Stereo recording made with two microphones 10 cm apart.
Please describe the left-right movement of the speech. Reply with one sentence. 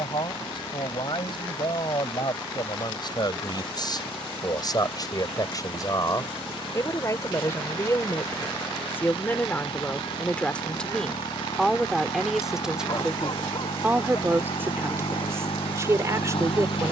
You can hear the speech move to the right.